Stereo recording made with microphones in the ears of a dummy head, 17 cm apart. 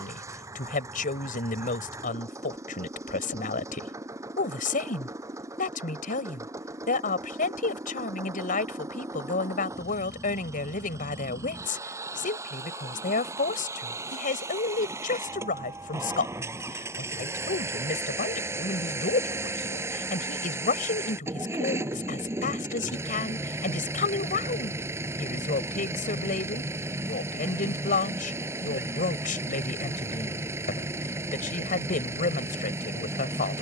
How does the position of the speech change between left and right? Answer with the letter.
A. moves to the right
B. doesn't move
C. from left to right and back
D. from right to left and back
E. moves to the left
B.